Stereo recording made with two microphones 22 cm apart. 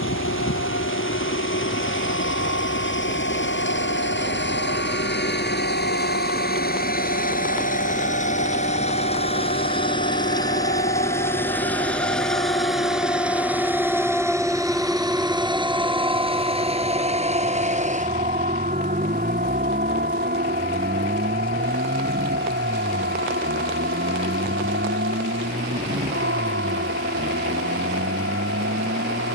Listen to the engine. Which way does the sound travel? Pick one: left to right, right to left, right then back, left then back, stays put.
left to right.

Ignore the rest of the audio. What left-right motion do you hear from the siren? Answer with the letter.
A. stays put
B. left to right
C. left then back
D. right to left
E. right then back
B.